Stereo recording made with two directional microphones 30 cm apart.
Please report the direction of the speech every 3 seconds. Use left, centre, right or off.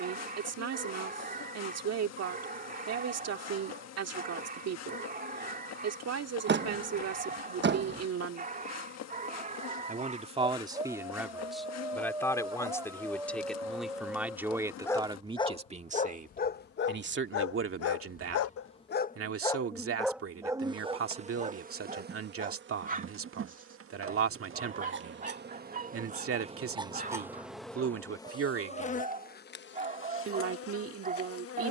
right, right, right, centre, centre, right, right, right, right, right, right.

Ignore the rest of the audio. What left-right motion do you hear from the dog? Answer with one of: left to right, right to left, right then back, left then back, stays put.
left then back.